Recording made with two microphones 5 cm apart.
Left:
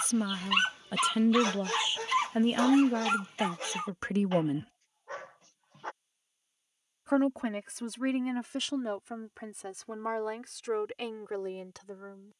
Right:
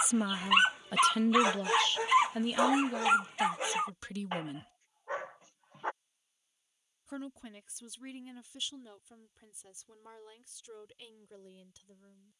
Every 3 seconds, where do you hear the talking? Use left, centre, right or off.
centre, left, left, left.